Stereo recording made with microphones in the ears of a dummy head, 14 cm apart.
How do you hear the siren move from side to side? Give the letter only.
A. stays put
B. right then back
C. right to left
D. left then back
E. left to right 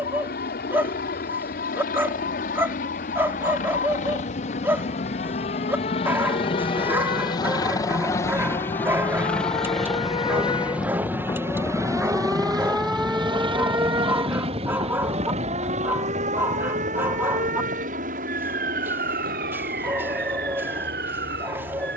E.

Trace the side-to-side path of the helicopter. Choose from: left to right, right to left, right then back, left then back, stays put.
left to right.